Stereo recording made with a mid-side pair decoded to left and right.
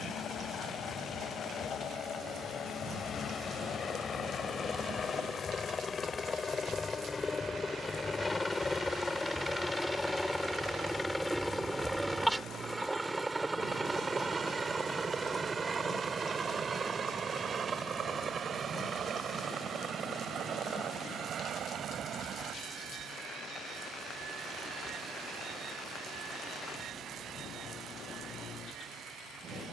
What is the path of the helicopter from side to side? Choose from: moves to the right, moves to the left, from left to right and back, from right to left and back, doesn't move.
moves to the right.